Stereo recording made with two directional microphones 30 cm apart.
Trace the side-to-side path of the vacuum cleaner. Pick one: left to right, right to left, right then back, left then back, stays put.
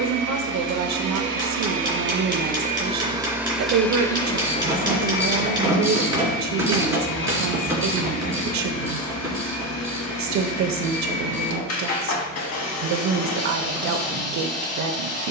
right to left.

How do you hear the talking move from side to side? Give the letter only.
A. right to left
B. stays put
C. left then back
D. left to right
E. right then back
B.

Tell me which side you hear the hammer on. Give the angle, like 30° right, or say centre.
10° right.